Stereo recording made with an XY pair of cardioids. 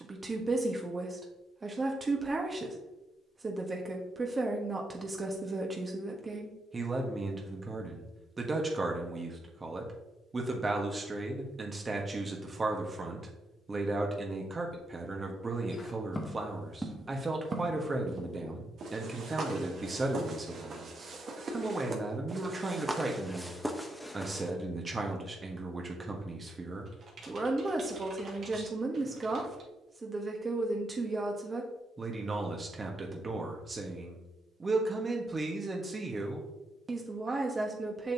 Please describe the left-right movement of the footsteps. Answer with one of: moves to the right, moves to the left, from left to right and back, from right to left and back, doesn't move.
from left to right and back.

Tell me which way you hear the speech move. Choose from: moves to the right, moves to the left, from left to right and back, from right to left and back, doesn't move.
doesn't move.